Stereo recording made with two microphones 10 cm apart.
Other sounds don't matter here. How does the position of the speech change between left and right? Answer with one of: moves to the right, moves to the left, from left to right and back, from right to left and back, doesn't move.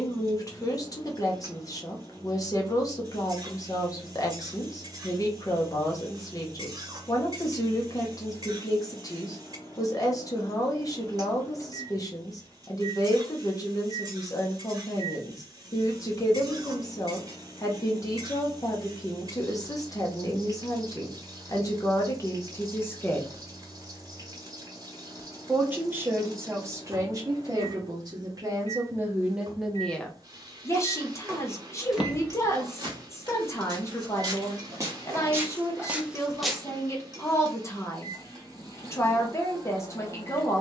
from left to right and back.